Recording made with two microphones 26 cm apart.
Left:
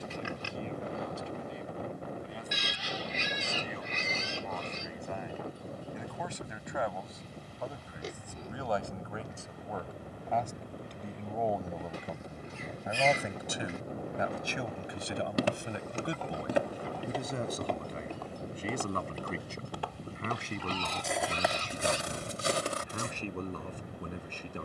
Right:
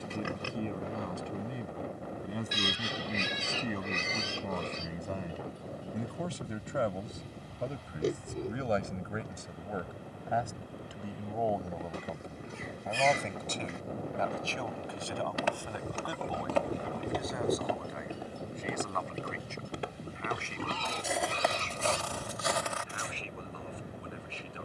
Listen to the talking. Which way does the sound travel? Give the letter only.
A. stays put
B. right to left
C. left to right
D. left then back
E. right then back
B.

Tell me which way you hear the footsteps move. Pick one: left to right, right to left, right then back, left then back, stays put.
right then back.